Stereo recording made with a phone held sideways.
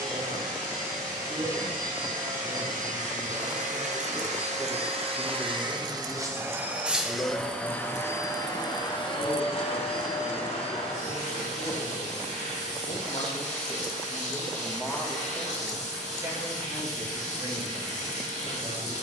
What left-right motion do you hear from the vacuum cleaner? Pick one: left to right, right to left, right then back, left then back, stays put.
right to left.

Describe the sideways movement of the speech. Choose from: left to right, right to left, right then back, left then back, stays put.
left then back.